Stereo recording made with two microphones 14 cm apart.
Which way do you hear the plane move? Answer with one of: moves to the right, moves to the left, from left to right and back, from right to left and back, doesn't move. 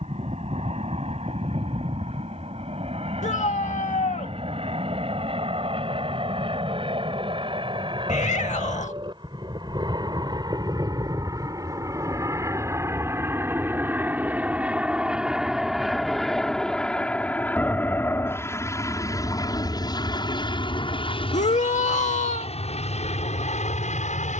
moves to the left.